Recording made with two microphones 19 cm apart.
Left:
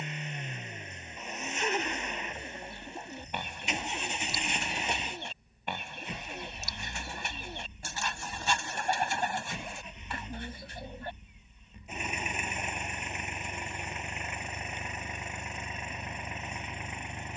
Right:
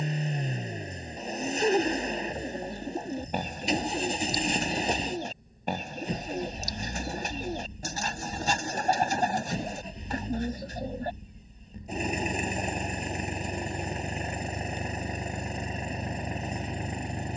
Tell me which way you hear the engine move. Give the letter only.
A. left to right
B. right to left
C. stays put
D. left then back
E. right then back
C.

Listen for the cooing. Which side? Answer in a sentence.
In this clip you hear the cooing on the right.